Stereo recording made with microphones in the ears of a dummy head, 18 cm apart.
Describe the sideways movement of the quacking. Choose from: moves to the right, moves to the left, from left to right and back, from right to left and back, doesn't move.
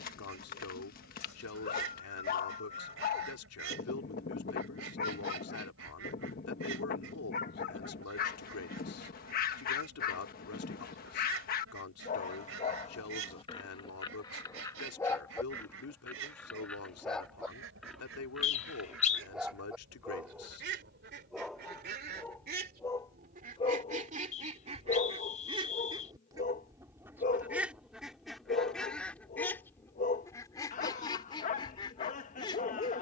moves to the left.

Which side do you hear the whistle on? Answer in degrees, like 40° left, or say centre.
40° left.